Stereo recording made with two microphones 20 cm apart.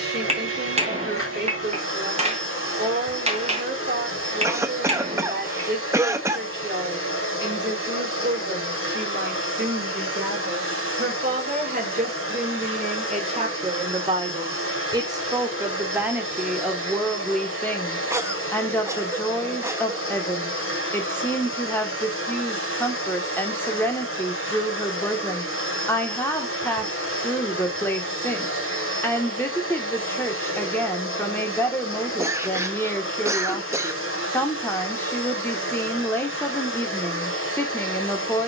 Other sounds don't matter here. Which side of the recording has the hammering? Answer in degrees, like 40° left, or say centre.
30° right.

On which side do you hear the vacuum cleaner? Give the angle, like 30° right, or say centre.
80° left.